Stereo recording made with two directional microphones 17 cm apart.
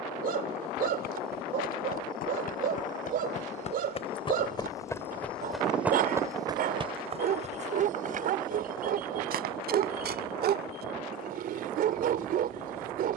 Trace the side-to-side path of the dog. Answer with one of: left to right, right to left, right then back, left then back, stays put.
stays put.